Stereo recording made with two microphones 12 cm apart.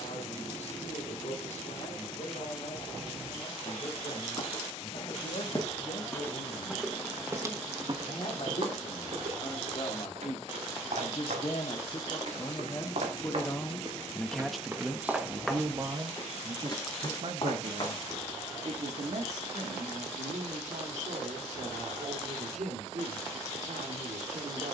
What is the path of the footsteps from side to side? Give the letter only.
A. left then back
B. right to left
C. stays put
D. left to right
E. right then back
E.